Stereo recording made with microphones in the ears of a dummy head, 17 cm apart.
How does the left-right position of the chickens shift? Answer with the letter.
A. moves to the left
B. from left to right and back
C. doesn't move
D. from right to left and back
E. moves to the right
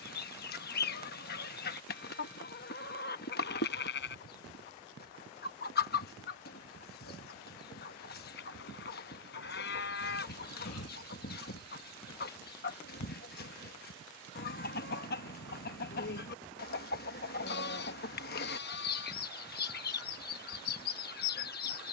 C.